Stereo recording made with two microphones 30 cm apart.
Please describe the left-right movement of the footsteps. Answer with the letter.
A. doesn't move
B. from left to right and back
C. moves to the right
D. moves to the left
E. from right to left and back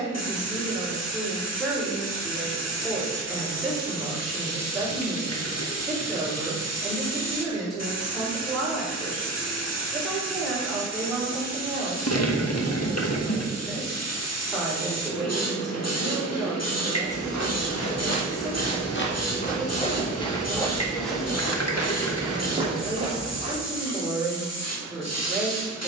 C.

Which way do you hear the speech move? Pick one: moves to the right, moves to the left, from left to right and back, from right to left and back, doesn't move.
doesn't move.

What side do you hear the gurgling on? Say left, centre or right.
left.